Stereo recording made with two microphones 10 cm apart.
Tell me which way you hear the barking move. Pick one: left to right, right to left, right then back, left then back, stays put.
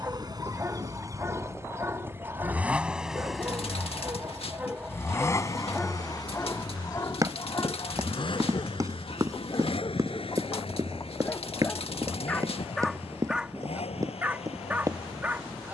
left then back.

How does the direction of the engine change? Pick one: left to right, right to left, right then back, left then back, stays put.
right to left.